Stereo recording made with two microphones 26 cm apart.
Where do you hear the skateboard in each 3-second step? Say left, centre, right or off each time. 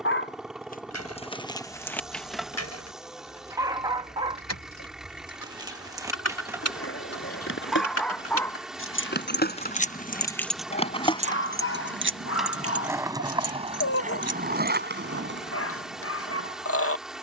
off, off, left, left, right, right.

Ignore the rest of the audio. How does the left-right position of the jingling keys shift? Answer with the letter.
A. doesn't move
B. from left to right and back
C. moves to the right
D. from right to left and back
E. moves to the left
C.